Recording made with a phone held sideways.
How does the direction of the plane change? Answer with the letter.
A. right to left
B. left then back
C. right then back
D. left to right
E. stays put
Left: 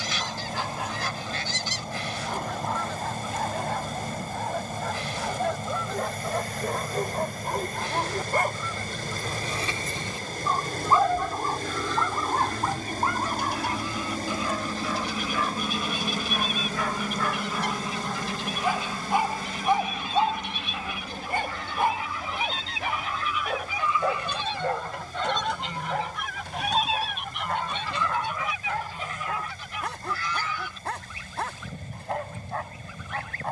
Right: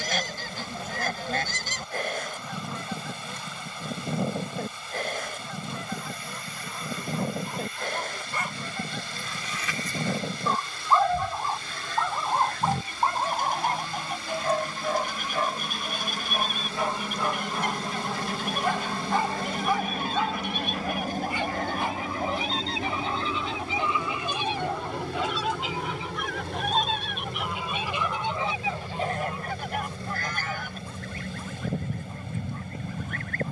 D.